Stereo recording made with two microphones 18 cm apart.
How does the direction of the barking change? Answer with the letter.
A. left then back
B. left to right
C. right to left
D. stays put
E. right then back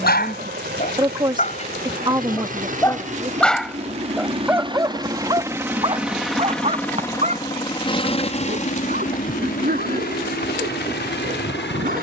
B.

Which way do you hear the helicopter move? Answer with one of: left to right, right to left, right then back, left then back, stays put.
right to left.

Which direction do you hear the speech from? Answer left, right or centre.
right.